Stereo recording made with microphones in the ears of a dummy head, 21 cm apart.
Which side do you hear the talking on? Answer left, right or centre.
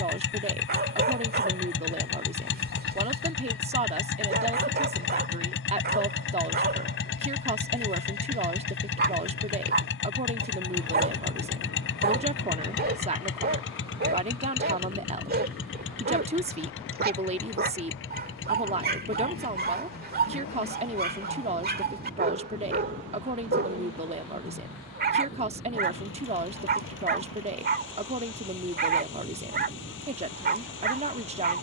right.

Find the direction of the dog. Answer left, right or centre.
right.